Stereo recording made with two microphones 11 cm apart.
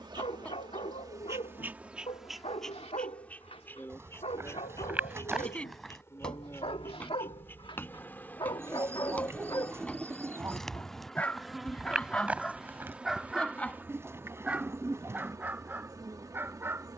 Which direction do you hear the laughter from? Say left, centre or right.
centre.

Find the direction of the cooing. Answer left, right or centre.
right.